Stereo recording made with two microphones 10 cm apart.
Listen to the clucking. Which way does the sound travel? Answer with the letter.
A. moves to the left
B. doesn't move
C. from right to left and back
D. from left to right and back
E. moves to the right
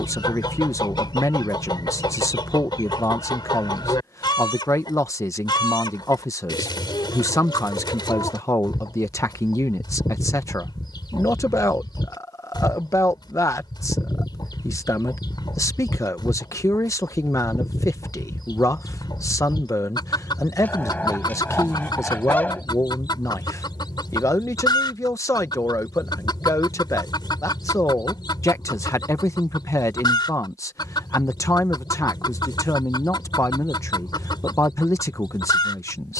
B.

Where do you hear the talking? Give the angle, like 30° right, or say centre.
30° left.